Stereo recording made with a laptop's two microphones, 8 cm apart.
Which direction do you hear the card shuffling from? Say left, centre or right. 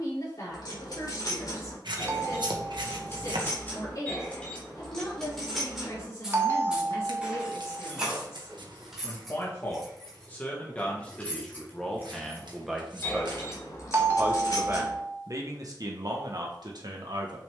right.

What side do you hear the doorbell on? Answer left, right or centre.
right.